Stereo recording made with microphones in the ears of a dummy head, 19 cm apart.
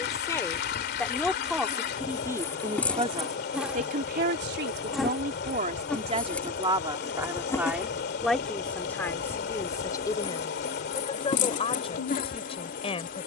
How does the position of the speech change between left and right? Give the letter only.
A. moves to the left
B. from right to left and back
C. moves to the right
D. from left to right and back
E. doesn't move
D.